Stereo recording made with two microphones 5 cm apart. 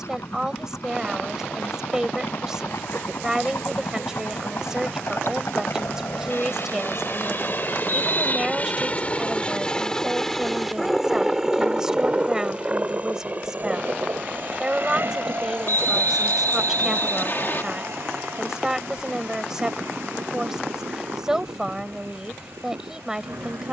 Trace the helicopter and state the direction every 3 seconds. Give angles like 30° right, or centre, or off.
80° left, 70° left, 50° left, 10° left, 30° right, 50° right, 60° right, 60° right.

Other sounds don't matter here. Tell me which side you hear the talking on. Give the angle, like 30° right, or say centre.
10° right.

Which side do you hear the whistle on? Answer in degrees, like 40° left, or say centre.
50° left.